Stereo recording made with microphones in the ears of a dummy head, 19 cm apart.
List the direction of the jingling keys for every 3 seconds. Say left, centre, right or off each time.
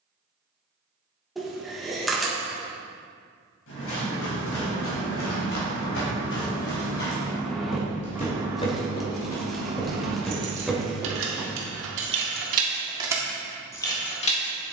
off, left, centre, right, centre.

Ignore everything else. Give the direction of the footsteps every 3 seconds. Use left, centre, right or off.
off, left, left, centre, off.